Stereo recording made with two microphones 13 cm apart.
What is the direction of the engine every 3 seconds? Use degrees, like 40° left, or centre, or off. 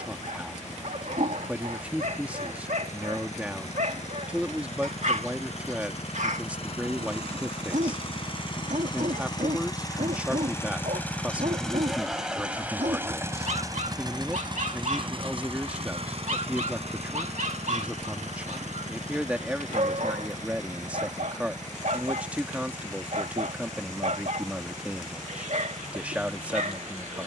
70° left, 60° left, 50° left, 20° left, 20° right, 50° right, 70° right, 80° right, 80° right.